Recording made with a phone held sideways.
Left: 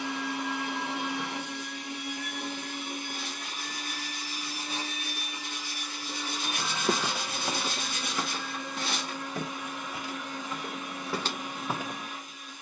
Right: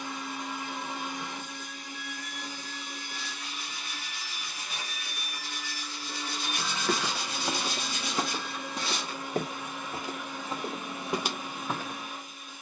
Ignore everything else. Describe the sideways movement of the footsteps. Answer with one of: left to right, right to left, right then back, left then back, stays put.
right then back.